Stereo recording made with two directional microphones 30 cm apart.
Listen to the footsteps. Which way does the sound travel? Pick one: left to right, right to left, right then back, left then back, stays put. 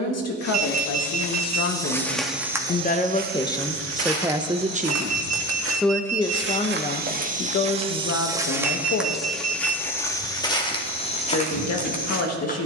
right then back.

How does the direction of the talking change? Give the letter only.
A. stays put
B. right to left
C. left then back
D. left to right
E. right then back
E.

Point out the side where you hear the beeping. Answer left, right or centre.
right.